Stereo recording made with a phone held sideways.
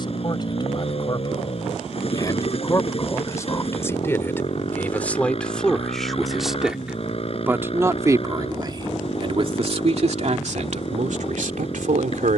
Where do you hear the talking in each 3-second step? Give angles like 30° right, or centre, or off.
30° left, 10° left, 20° right, 60° right.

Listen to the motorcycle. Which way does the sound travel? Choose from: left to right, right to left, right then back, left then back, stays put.
stays put.